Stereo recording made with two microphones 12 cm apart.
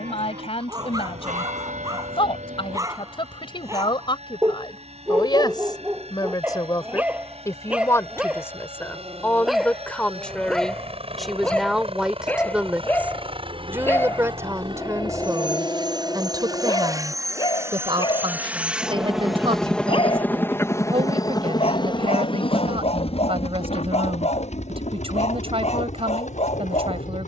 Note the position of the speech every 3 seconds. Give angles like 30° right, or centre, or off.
50° left, 40° left, 20° left, centre, 20° right, 30° right, 50° right, 50° right, 50° right.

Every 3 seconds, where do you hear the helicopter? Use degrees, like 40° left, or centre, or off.
70° right, 60° right, 60° right, 60° right, 50° right, 30° right, centre, 40° left, 70° left.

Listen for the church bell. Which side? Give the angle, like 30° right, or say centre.
90° right.